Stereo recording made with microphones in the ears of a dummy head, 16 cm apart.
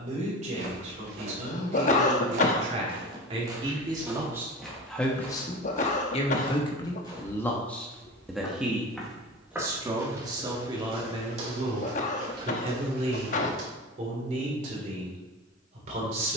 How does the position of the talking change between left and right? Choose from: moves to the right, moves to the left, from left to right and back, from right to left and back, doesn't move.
from right to left and back.